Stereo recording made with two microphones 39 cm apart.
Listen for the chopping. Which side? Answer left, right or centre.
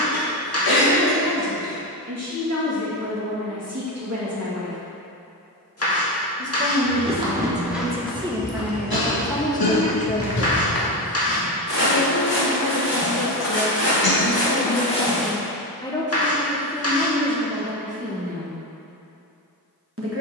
left.